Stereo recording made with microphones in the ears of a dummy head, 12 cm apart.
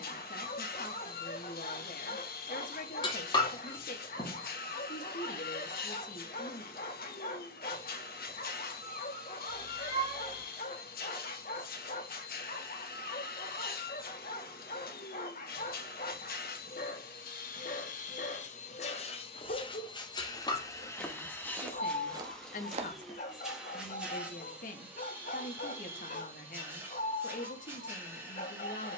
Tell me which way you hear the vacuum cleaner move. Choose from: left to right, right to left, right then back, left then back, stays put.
left to right.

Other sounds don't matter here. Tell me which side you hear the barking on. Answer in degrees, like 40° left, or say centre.
60° left.